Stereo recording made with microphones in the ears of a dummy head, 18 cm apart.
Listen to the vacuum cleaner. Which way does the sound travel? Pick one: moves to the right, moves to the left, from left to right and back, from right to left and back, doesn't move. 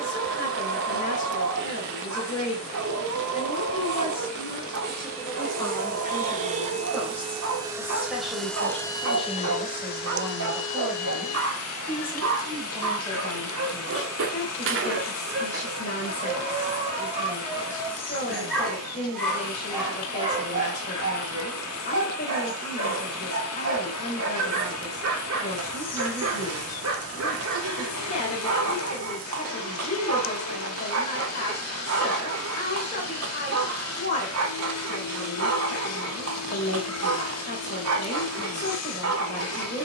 moves to the left.